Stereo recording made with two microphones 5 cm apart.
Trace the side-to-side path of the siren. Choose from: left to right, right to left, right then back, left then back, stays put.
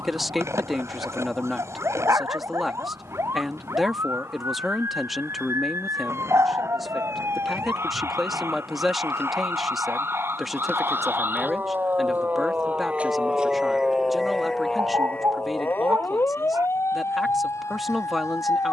right to left.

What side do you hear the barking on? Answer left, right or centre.
right.